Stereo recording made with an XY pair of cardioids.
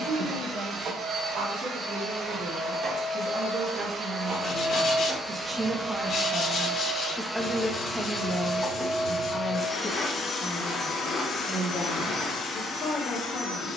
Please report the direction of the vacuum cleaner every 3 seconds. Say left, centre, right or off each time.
right, right, centre, left, left.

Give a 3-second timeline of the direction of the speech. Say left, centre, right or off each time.
right, right, centre, left, left.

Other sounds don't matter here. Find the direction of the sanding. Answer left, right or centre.
left.